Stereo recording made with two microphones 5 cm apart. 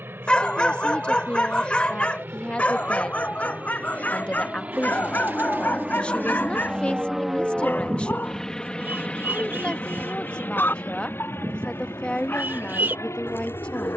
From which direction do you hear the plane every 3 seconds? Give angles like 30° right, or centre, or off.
50° right, 30° right, centre, 40° left, 60° left.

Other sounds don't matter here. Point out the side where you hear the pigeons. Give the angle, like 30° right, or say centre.
40° right.